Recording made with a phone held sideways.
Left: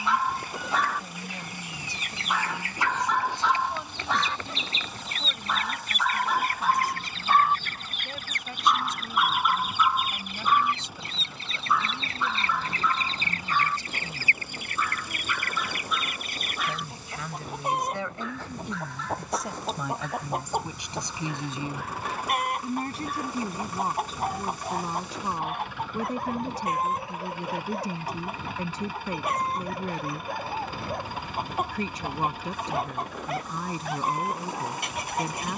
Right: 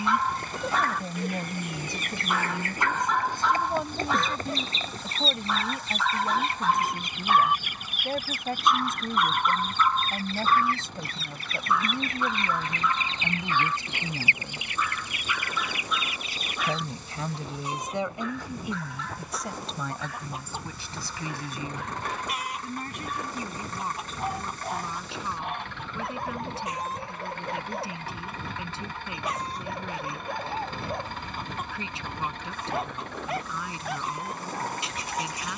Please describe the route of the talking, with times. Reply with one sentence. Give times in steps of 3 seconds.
In this clip you hear the talking on the right from 0 s, in the centre from 18 s and on the left from 21 s.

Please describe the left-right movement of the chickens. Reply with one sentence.
You can hear the chickens move to the left.